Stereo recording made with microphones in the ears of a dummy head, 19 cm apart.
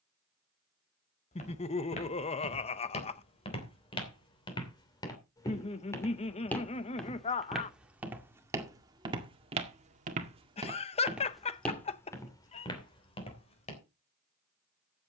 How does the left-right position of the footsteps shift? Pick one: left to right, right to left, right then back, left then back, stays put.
right then back.